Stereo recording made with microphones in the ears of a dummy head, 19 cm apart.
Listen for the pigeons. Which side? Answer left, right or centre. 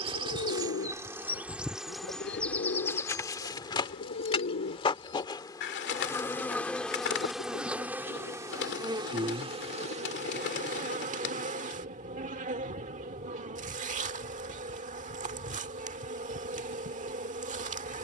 left.